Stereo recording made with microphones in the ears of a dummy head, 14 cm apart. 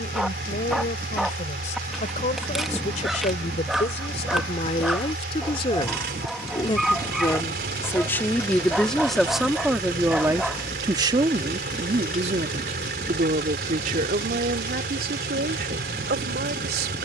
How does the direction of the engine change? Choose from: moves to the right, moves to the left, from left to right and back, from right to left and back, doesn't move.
doesn't move.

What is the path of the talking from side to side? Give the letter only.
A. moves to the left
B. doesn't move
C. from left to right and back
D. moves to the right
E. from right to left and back
D.